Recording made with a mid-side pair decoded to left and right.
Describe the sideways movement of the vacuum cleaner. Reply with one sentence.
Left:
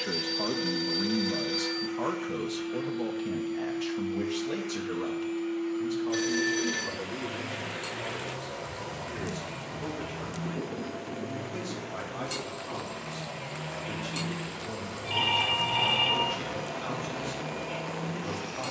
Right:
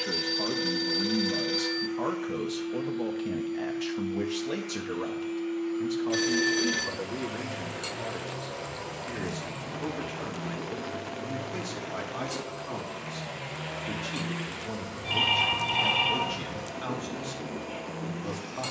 In this clip you hear the vacuum cleaner move from left to right and back again.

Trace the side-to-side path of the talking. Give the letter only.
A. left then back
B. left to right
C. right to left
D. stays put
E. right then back
B.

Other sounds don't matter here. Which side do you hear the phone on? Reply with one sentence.
In this clip you hear the phone on the right.